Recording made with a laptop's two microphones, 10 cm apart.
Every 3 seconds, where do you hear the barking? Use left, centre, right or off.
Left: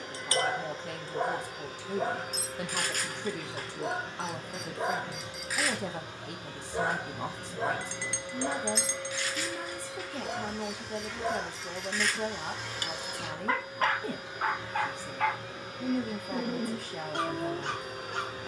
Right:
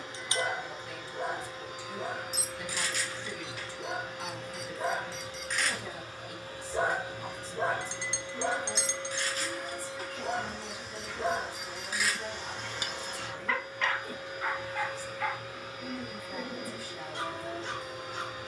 left, left, right, right, left, left.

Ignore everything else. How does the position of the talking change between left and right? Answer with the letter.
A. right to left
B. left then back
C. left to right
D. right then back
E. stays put
E.